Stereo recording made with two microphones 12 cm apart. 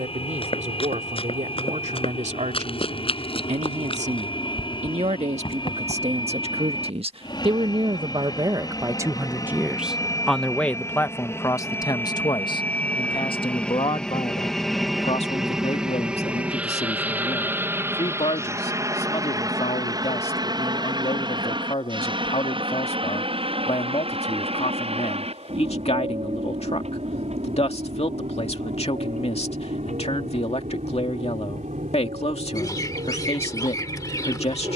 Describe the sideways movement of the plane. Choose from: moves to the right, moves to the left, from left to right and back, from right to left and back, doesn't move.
moves to the right.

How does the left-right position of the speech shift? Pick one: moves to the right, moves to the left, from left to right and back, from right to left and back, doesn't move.
moves to the left.